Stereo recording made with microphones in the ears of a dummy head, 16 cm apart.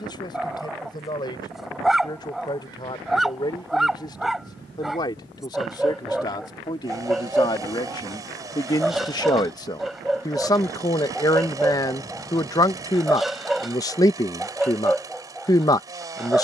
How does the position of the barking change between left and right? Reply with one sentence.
You can hear the barking stay in one place.